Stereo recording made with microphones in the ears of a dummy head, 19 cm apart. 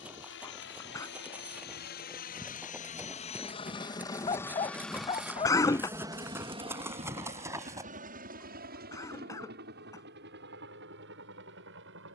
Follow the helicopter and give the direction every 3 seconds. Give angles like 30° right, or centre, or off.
50° left, 10° left, 30° right, 50° right.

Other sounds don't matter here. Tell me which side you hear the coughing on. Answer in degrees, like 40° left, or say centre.
20° left.